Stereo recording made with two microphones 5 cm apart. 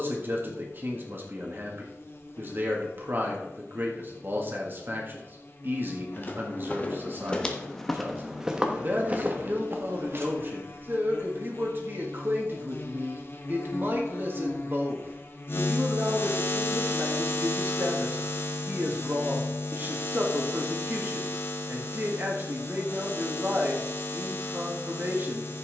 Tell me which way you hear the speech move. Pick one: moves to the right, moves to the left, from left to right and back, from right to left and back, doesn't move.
doesn't move.